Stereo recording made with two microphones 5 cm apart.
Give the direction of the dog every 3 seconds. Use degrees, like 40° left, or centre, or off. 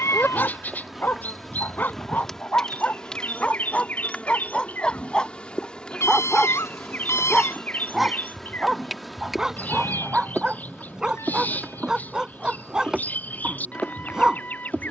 40° left, 20° left, centre, 10° right, 10° right.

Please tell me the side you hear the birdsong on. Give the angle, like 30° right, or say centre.
40° left.